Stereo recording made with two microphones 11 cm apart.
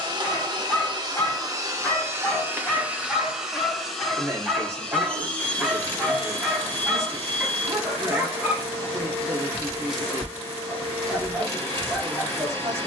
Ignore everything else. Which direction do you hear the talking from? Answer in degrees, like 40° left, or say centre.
30° right.